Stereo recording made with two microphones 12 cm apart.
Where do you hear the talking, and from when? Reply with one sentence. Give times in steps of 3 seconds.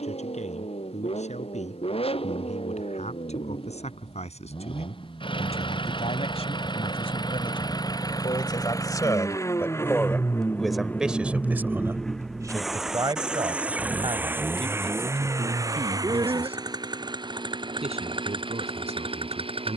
In this clip you hear the talking on the left from 0 s, in the centre from 9 s and on the right from 12 s.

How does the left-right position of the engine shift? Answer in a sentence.
You can hear the engine travel towards the right.